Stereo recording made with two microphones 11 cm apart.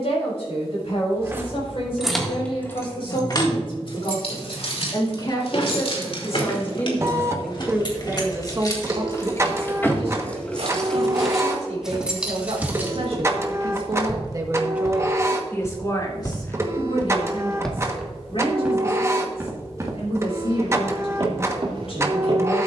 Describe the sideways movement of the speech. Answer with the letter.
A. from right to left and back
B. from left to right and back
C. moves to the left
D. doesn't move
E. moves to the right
B.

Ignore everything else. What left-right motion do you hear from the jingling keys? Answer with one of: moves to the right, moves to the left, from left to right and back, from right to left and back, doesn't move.
from right to left and back.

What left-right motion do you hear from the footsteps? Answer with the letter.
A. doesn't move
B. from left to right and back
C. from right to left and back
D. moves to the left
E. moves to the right
C.